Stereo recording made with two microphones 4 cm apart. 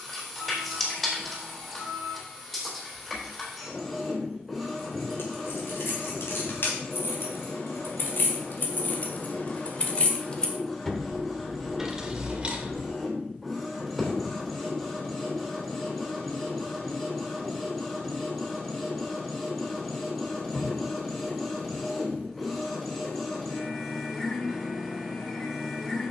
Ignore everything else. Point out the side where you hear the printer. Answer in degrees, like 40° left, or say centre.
10° left.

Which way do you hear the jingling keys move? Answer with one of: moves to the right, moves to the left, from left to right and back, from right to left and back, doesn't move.
moves to the right.